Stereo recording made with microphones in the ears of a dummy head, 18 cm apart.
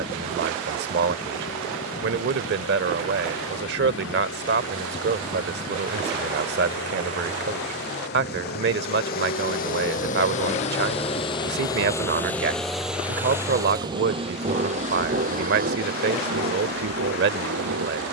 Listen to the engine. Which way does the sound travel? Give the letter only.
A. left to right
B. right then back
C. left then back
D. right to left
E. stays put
A.